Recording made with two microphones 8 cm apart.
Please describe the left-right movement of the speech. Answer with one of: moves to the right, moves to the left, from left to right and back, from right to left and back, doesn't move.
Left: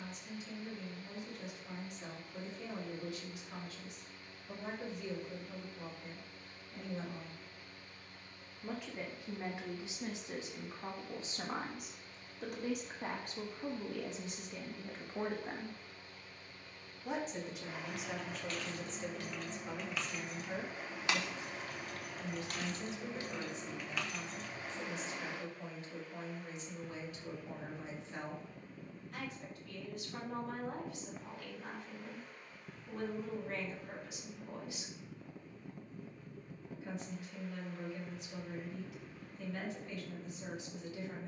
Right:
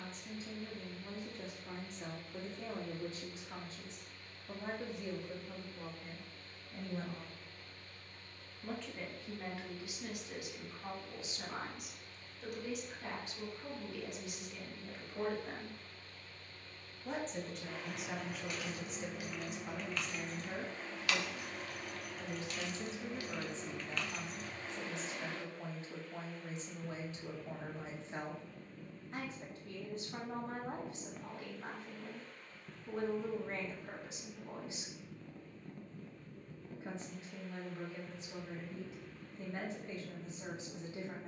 from right to left and back.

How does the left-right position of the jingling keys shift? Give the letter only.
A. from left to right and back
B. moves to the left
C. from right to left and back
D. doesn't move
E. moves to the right
C.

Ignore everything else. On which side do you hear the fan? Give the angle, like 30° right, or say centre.
10° left.